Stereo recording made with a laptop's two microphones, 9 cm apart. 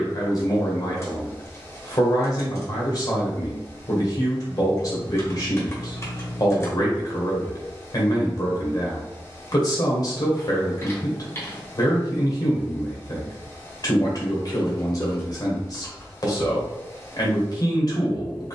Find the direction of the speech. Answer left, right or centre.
left.